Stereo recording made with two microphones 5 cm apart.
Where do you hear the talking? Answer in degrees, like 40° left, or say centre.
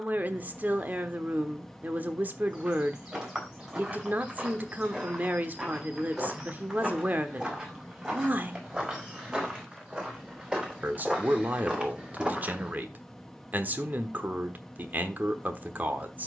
40° right.